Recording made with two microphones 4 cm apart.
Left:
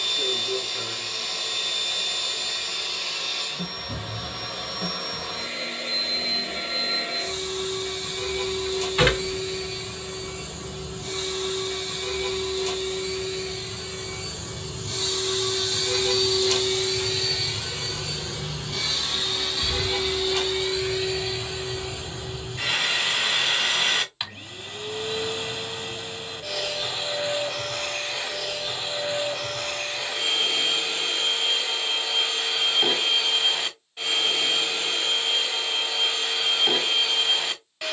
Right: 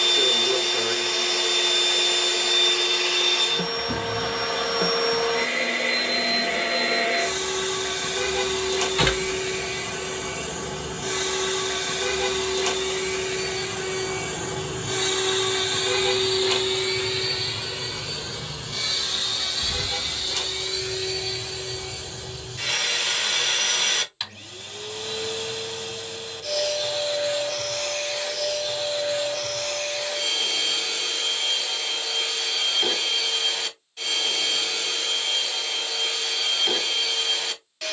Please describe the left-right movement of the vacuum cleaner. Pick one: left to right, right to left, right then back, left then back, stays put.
right to left.